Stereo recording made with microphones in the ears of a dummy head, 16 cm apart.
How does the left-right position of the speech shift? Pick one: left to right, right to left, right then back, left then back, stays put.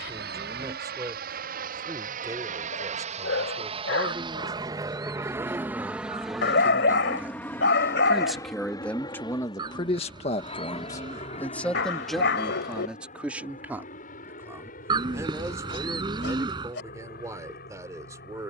left then back.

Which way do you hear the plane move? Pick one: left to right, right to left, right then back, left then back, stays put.
right to left.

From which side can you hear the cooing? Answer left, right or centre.
right.